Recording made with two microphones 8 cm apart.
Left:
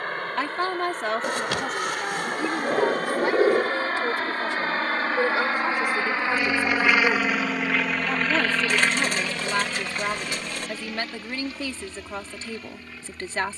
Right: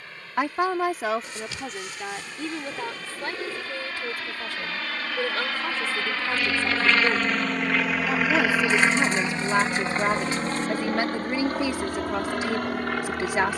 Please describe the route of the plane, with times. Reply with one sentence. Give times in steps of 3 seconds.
You can hear the plane on the left from 0 s, in the centre from 6 s and on the right from 9 s.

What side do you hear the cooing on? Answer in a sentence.
You can hear the cooing on the left.